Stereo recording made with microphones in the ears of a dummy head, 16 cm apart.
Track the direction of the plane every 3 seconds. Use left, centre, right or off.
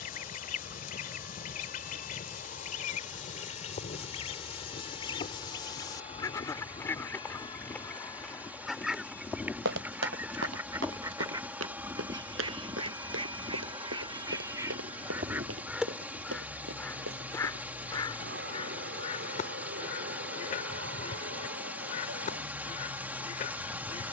left, left, left, centre, right, right, right, right.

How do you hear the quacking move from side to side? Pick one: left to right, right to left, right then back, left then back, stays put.
right then back.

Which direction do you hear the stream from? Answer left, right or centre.
centre.